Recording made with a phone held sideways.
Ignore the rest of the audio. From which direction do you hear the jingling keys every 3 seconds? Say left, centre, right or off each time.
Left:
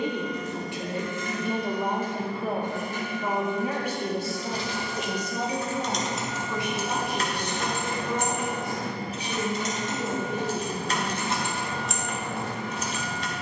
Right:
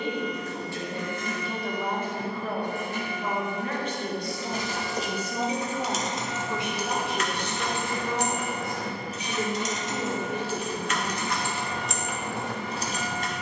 off, right, left, left, right.